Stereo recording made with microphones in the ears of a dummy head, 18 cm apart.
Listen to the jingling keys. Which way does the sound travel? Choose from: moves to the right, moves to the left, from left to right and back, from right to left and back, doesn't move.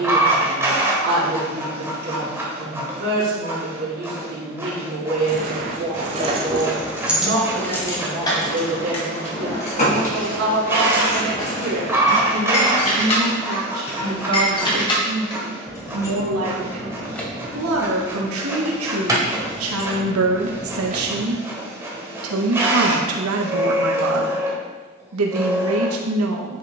from right to left and back.